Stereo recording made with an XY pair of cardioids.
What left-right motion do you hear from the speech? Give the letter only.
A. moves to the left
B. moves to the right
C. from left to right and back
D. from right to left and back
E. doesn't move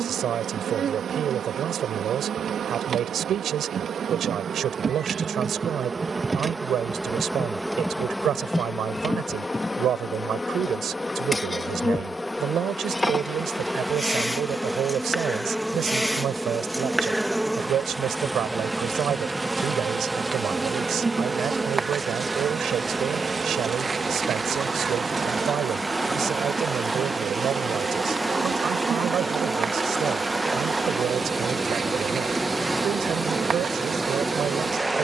E.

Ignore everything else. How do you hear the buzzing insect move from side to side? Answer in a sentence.
You can hear the buzzing insect go left and come back.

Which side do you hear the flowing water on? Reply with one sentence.
In this clip you hear the flowing water in the centre.